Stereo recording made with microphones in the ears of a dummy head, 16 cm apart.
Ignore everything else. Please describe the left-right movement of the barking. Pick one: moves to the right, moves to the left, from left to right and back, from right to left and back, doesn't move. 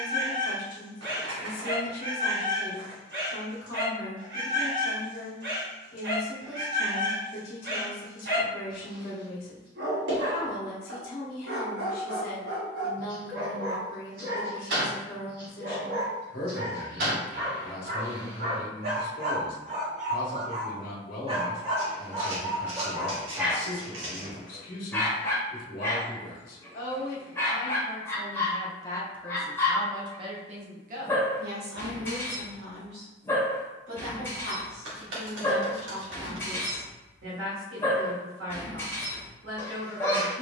moves to the left.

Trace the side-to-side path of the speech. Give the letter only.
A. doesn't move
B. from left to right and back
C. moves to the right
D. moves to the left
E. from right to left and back
C.